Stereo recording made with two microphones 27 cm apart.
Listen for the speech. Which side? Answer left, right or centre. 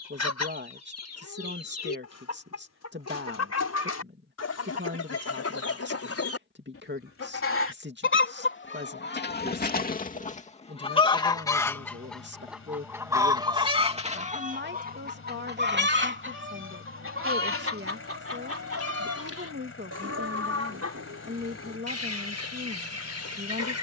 right.